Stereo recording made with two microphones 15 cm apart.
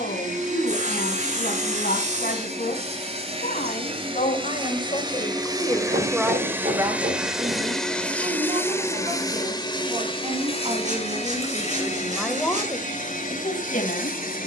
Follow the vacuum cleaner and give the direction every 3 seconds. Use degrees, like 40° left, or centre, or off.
50° right, 30° right, centre, 40° left, 60° left.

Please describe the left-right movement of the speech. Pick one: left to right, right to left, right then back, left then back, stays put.
right then back.